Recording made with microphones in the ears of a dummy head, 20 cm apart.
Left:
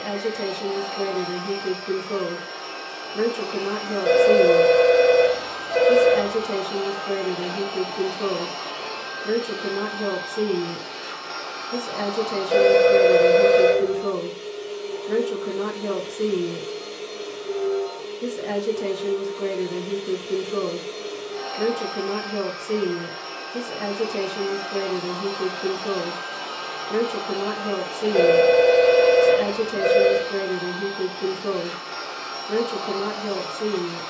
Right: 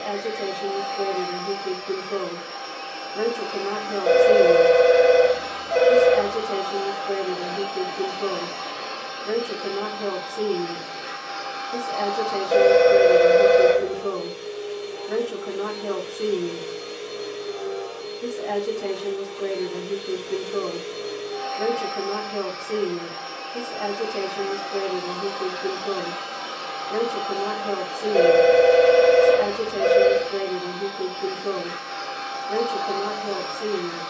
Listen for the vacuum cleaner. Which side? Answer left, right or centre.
left.